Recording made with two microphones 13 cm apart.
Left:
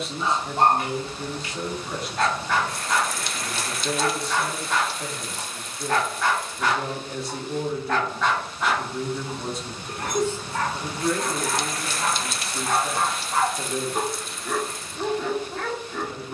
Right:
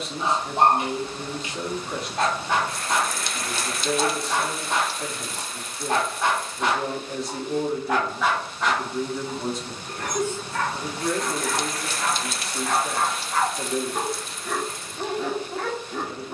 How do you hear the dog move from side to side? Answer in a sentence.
You can hear the dog go left and come back.